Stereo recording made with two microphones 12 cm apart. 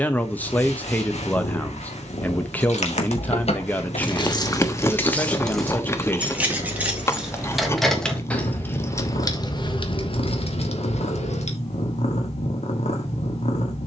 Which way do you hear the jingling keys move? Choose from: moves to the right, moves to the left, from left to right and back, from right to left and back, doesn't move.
from left to right and back.